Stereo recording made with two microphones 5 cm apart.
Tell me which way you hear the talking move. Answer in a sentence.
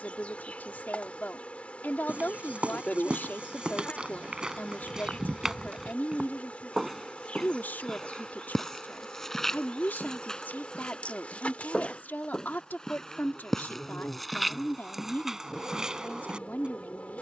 You can hear the talking stay put.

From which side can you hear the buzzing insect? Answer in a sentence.
In this clip you hear the buzzing insect on the left.